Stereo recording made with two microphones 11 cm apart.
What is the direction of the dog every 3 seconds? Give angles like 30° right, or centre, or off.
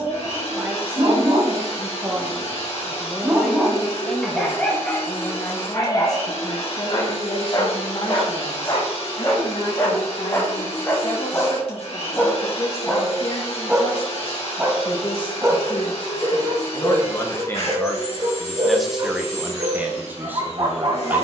40° right, 10° left, 40° left, 30° left, centre, 40° right, 50° right.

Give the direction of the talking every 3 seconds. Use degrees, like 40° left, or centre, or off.
20° right, 10° left, 50° left, 60° left, 60° left, 30° left, 10° right.